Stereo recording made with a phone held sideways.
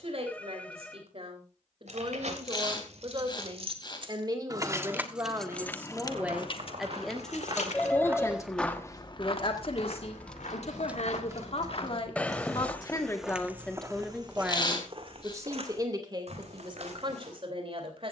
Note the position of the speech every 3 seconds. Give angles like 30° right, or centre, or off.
50° right, 30° right, 10° left, 50° left, 10° left, 40° right.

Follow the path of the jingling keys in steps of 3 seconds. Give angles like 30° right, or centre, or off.
60° right, 20° right, 50° left, centre, 50° right, off.